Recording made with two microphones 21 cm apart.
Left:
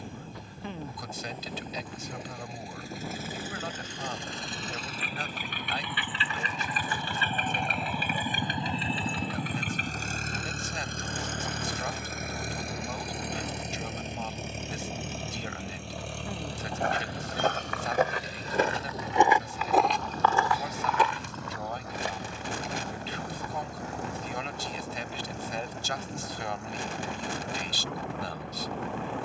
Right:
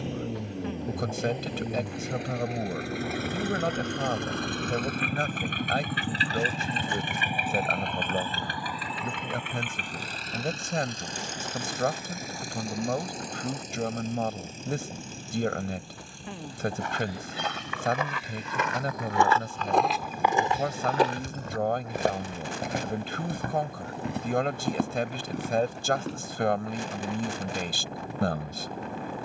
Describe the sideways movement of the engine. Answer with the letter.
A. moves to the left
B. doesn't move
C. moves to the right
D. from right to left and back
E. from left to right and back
A.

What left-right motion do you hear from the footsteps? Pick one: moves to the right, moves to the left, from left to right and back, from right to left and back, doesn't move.
moves to the right.